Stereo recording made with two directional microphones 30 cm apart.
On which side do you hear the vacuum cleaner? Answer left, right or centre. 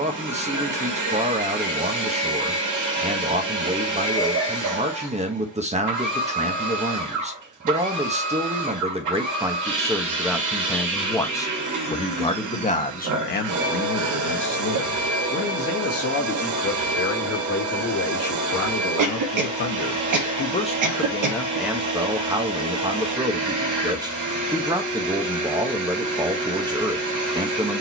right.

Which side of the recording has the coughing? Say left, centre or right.
right.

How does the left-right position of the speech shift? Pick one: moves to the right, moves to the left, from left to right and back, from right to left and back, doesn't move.
from right to left and back.